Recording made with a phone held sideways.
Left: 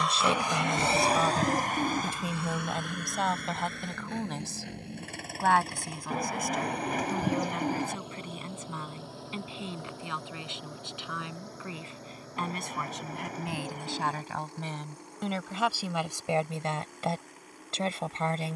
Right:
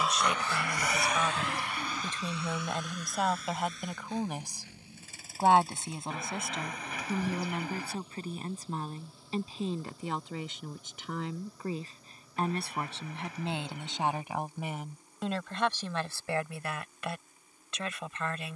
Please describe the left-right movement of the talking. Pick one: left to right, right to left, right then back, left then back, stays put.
right then back.